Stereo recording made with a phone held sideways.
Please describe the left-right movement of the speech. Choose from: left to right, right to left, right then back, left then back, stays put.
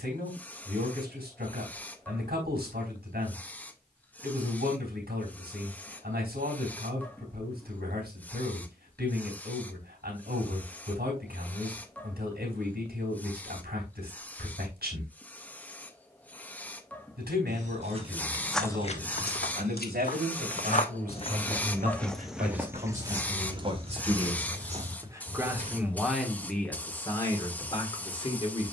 right to left.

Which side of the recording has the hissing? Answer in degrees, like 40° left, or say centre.
10° left.